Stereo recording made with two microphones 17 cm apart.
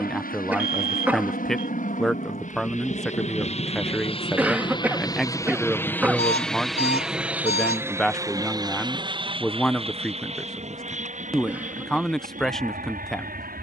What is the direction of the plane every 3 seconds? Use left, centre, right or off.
left, left, centre, right, right.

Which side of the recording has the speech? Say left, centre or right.
centre.